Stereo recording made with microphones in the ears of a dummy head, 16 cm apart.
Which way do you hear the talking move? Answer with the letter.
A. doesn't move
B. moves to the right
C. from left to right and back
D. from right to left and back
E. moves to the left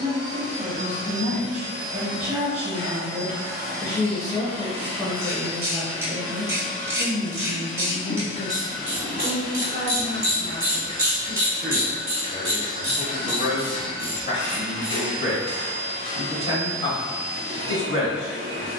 E.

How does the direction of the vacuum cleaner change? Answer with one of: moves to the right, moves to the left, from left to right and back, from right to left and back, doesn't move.
from right to left and back.